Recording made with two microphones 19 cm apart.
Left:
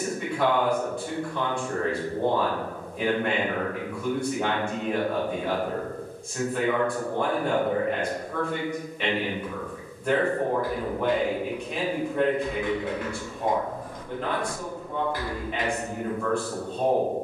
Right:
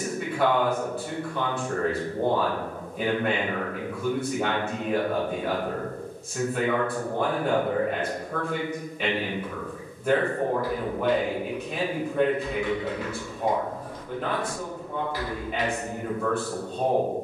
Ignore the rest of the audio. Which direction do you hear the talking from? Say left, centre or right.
centre.